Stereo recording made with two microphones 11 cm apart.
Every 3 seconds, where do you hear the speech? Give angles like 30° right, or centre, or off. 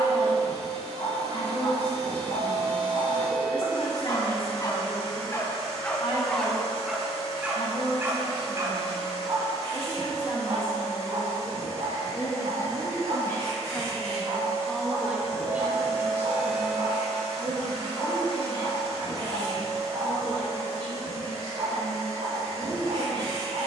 60° left, 60° left, 60° left, 50° left, 20° left, 20° right, 40° right, 50° right.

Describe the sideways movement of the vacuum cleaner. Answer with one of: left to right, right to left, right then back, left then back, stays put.
stays put.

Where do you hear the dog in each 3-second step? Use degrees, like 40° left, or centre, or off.
60° left, 30° left, 10° right, 50° right, 60° right, 70° right, 80° right, 80° right.